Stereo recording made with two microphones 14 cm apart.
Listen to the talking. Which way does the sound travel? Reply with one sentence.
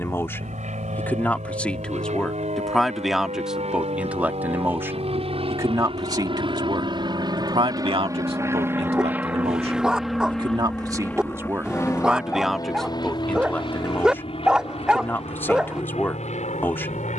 You can hear the talking go right and come back.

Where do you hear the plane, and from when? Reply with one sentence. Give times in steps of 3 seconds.
You can hear the plane on the right from 0 s, in the centre from 9 s and on the left from 12 s.